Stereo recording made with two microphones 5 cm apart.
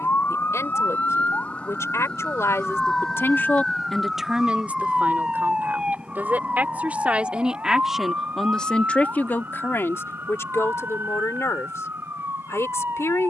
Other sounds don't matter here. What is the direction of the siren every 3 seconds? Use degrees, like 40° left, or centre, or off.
30° left, 10° right, 30° right, 40° right, 50° right.